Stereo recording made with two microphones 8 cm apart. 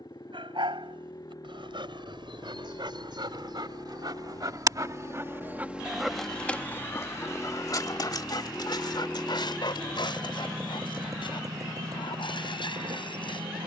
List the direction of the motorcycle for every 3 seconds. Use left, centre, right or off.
left, left, left, right, right.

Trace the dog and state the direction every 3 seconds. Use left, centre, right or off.
right, right, left, left, left.